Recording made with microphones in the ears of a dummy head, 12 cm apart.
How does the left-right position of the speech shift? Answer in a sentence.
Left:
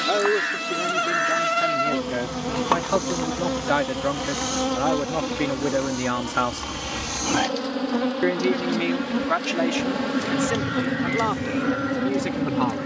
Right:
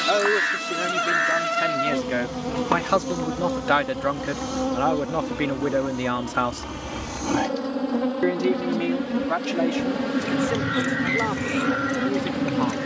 In this clip you hear the speech travel towards the left.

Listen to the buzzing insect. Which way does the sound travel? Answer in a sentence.
You can hear the buzzing insect move from right to left and back again.